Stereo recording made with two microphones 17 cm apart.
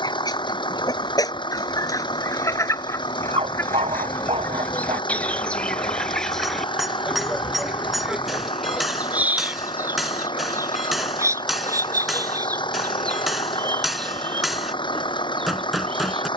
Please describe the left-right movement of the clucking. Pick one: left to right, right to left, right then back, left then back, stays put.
left to right.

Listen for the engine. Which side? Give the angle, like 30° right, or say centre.
30° left.